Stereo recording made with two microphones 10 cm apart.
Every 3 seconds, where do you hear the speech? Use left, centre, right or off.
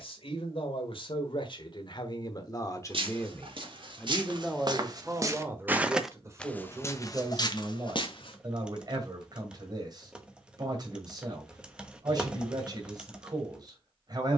left, centre, right, right, right.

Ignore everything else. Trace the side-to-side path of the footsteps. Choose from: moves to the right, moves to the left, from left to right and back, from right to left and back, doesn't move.
moves to the left.